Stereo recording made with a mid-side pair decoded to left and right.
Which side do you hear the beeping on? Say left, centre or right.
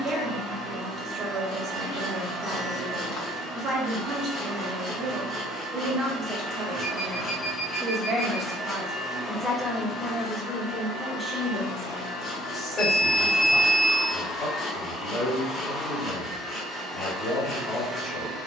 left.